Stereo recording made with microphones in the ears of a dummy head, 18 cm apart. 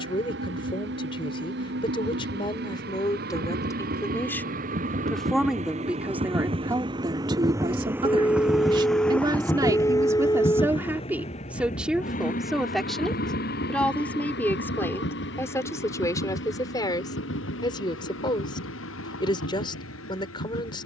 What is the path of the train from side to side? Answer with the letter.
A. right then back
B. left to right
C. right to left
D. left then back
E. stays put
C.